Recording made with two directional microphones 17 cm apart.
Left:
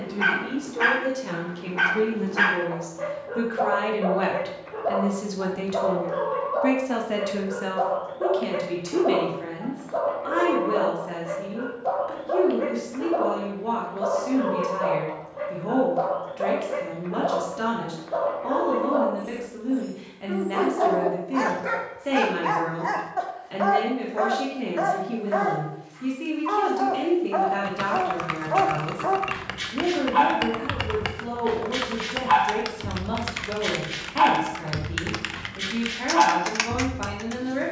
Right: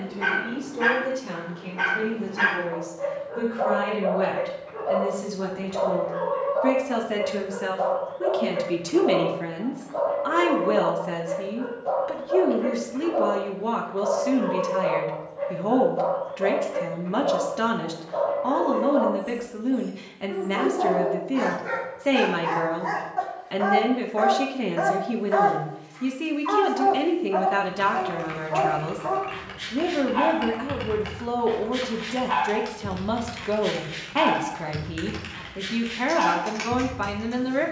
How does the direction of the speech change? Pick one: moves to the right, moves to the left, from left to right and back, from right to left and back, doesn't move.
moves to the right.